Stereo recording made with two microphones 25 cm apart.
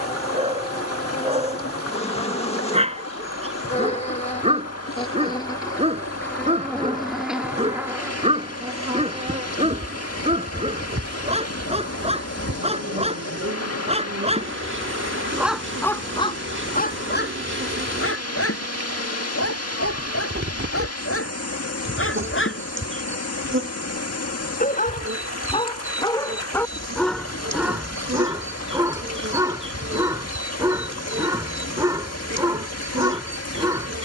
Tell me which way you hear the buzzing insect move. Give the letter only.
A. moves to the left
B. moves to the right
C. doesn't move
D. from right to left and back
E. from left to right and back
B.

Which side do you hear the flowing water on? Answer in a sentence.
In this clip you hear the flowing water on the left.